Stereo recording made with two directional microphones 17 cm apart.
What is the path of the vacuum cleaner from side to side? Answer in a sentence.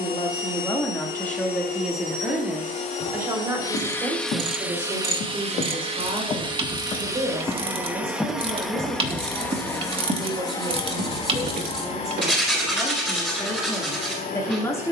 In this clip you hear the vacuum cleaner go right and come back.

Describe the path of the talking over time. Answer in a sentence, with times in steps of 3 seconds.
You can hear the talking in the centre from 0 s, on the right from 3 s and in the centre from 12 s.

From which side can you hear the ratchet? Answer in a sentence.
You can hear the ratchet on the right.